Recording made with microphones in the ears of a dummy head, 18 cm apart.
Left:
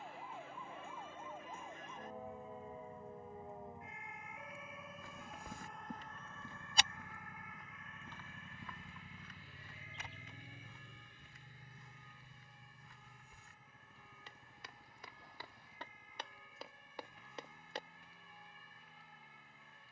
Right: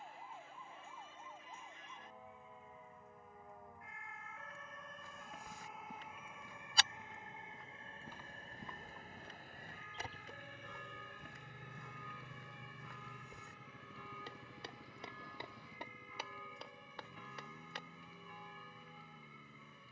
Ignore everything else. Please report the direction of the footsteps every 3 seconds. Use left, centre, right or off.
off, left, centre, right, right, centre, off.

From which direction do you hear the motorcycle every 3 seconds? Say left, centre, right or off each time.
left, left, left, centre, right, right, right.